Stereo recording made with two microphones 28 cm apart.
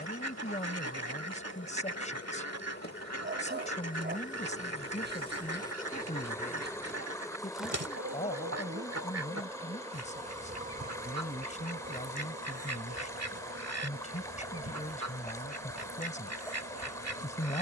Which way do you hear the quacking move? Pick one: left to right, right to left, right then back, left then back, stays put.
stays put.